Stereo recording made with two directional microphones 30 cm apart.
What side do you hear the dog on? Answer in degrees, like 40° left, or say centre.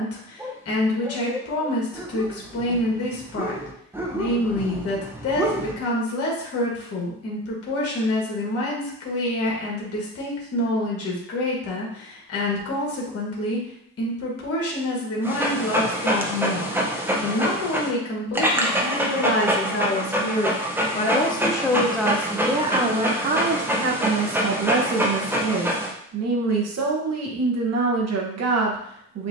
10° right.